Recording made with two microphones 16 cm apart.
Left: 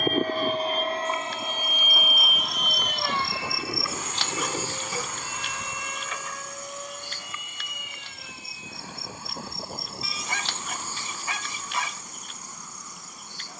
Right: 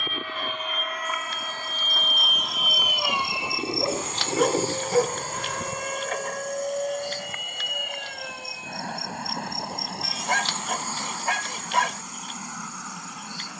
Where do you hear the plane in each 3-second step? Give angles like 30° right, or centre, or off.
20° left, 30° right, 50° right, 60° right, 60° right.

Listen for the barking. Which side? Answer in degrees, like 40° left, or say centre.
60° right.